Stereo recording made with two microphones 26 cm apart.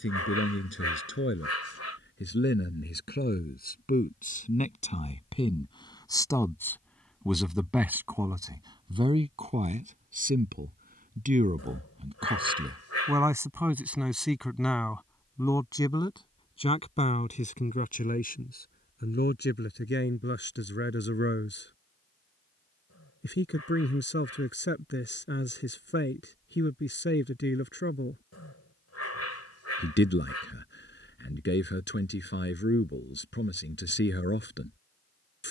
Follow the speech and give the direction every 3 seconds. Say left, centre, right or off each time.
left, left, centre, right, centre, left, left, left, left, left, left, left.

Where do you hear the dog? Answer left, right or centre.
left.